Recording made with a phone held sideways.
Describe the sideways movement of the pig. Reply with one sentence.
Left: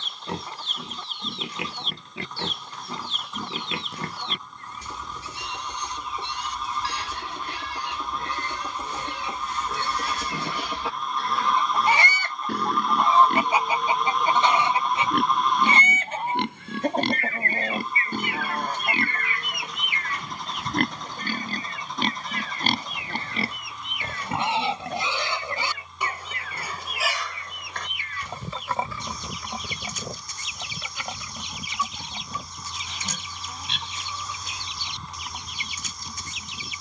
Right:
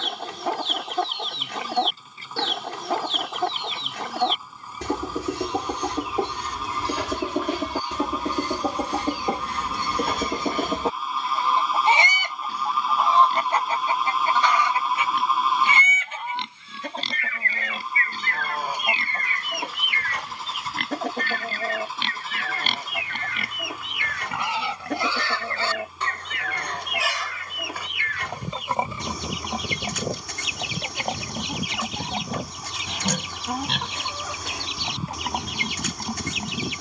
You can hear the pig move to the right.